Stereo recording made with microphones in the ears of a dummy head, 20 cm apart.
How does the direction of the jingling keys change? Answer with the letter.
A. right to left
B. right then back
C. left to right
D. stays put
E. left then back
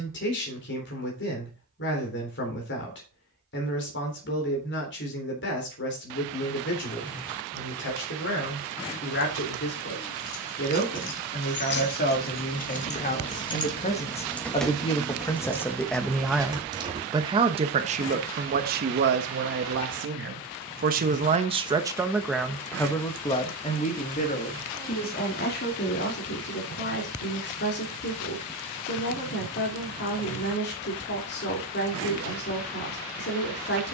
C.